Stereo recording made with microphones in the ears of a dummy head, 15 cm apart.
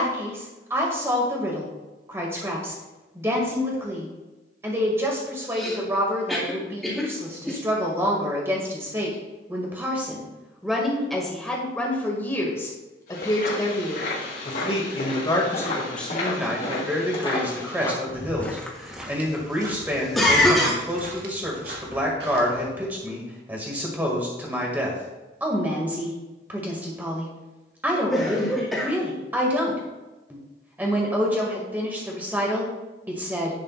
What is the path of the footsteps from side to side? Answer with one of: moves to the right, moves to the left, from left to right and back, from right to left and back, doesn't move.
moves to the right.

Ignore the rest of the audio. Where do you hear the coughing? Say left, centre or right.
centre.